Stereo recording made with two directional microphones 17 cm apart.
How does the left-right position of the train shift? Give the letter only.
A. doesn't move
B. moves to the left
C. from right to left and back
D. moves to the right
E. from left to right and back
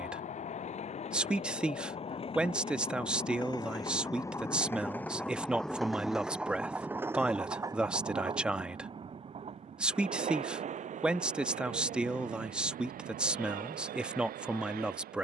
D.